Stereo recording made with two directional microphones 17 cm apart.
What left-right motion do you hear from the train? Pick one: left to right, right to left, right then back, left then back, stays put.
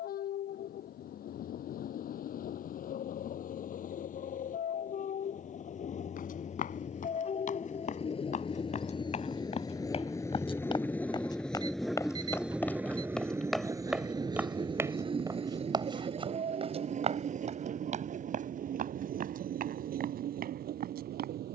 left to right.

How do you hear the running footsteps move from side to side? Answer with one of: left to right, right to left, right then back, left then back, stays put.
left to right.